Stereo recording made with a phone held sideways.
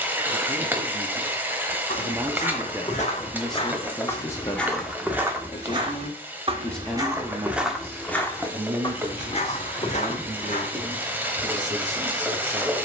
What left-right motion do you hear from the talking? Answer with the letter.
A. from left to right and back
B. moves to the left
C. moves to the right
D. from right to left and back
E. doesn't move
D.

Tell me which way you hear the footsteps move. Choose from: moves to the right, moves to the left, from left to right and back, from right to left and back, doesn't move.
from left to right and back.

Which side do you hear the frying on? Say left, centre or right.
centre.